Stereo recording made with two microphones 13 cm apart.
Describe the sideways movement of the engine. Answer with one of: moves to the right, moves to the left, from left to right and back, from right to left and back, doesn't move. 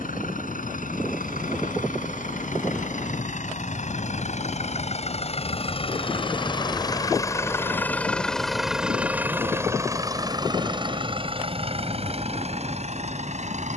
moves to the right.